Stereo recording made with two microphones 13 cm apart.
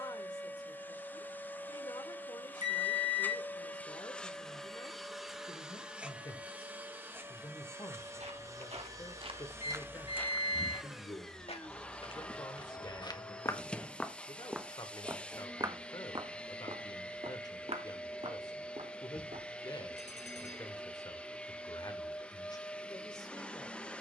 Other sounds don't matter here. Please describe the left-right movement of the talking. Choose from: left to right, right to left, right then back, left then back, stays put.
stays put.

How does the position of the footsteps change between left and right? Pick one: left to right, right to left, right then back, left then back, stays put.
left then back.